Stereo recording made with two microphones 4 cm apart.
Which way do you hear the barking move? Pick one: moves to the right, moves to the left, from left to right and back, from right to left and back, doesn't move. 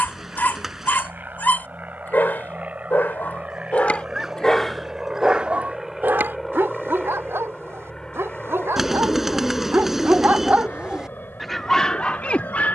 from left to right and back.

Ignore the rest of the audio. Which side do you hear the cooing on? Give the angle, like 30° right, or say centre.
centre.